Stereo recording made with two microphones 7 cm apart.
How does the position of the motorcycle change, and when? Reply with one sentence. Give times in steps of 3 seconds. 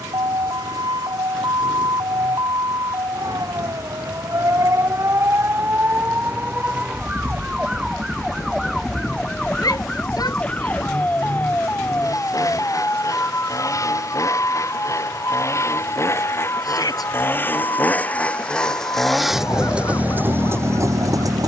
In this clip you hear the motorcycle on the left from 0 s and in the centre from 18 s.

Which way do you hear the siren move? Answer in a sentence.
You can hear the siren move to the left.